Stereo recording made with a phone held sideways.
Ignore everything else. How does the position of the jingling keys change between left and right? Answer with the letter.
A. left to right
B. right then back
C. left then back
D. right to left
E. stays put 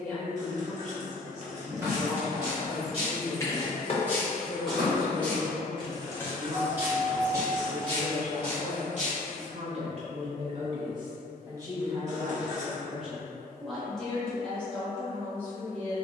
C.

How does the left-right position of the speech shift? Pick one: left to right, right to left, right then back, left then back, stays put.
right then back.